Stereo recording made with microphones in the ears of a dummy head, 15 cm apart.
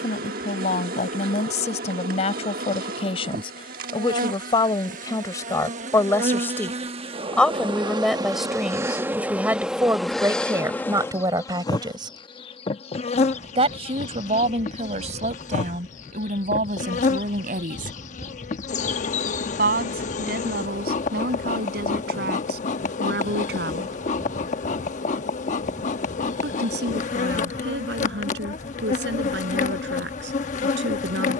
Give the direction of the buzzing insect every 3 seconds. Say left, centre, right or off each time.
right, right, right, centre, left, left, left, left, left, left, left.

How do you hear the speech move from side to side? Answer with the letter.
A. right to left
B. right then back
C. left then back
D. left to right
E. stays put
D.